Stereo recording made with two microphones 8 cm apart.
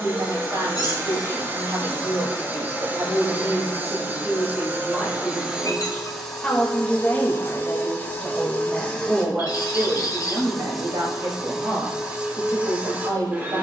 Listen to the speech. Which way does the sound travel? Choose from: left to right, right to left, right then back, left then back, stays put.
left then back.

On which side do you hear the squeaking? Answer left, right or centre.
left.